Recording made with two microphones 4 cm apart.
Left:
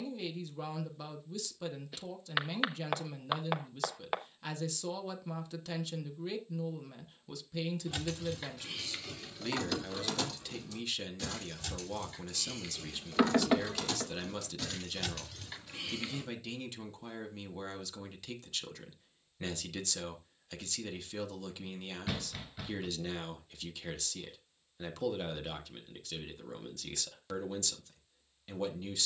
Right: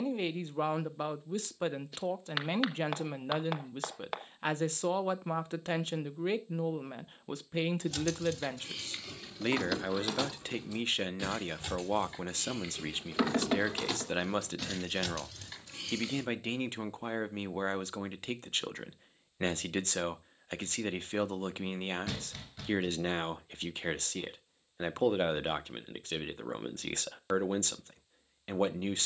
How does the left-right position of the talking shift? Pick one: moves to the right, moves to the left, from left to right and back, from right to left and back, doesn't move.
doesn't move.